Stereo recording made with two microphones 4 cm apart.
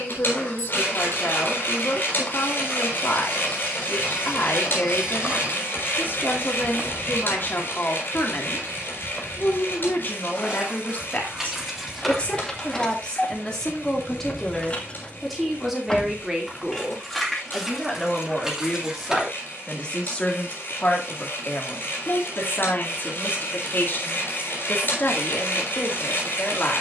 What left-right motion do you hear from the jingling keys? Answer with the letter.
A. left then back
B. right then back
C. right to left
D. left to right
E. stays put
A.